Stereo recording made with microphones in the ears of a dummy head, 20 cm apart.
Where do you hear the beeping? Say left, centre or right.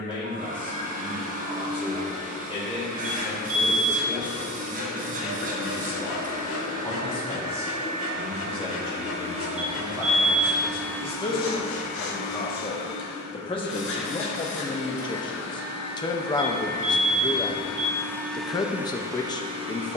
right.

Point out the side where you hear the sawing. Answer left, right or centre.
left.